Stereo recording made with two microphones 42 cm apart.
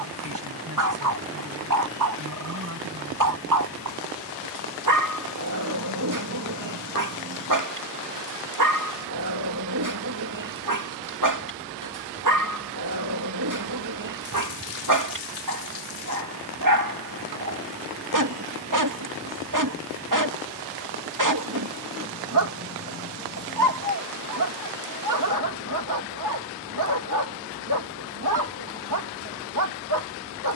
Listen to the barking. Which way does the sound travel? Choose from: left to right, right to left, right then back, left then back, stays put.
stays put.